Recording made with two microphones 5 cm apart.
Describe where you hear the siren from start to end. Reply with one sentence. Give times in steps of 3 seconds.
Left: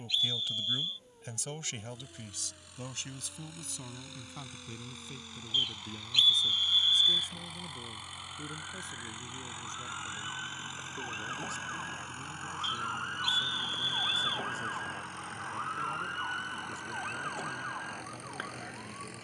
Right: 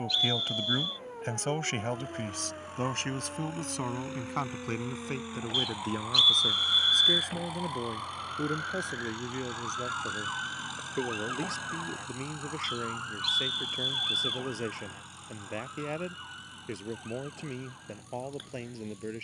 In this clip you hear the siren on the right from 0 s, in the centre from 12 s and on the left from 15 s.